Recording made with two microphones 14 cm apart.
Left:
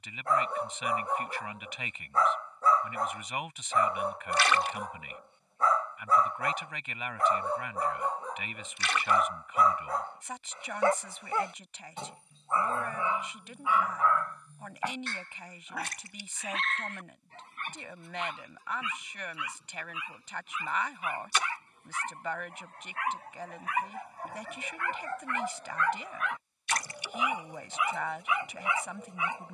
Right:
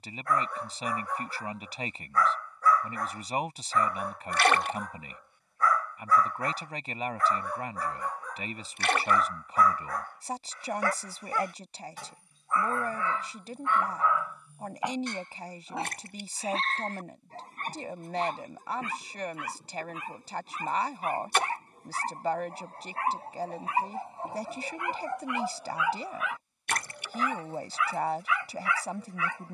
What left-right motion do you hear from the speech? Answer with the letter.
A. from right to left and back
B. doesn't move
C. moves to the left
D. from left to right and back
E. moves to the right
B.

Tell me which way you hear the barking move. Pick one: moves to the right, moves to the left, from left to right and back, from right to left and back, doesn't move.
from left to right and back.